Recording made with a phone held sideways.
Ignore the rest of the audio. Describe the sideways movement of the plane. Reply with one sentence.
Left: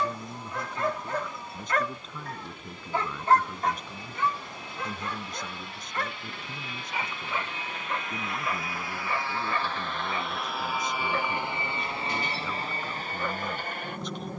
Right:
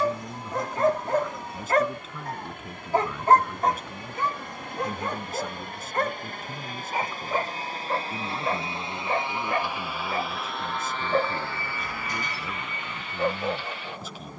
You can hear the plane move to the left.